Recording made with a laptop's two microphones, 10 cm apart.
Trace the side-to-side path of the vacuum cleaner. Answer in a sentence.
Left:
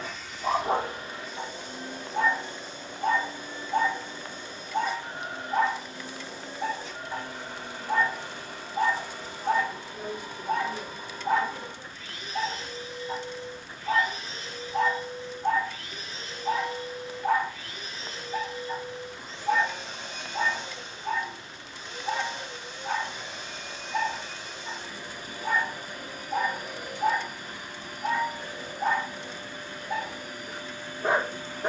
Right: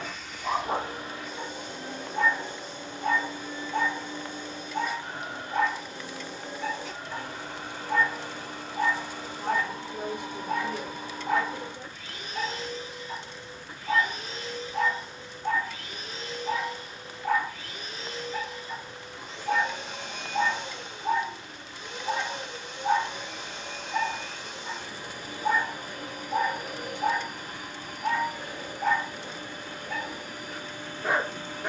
You can hear the vacuum cleaner stay put.